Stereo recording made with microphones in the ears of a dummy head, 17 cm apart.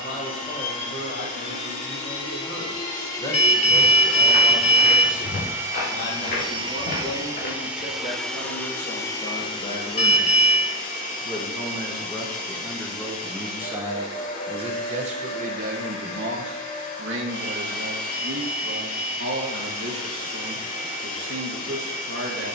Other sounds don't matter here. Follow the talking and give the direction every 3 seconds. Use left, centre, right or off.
left, left, left, left, centre, right, right, right.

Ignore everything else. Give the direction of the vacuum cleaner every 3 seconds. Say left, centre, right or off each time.
left, centre, centre, left, left, left, left, left.